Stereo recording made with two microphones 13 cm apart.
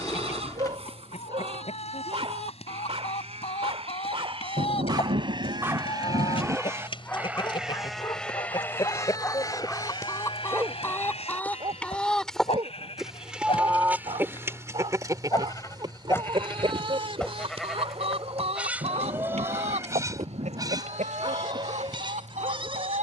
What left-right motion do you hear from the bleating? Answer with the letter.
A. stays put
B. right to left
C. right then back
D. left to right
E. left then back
E.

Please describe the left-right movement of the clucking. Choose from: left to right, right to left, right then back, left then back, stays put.
left to right.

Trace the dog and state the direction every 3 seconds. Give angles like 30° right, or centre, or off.
50° right, 30° right, 20° left, 10° right, 40° right, 40° right, 40° right, 40° right.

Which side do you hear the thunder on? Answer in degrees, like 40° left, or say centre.
60° right.